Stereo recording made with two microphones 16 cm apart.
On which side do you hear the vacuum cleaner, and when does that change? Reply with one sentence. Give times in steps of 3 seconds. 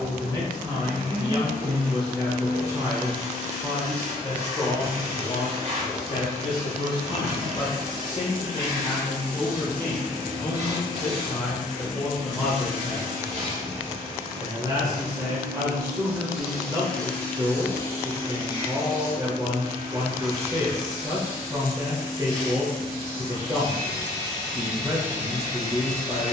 In this clip you hear the vacuum cleaner on the right from 0 s, in the centre from 15 s and on the left from 18 s.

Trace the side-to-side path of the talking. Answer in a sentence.
You can hear the talking go left and come back.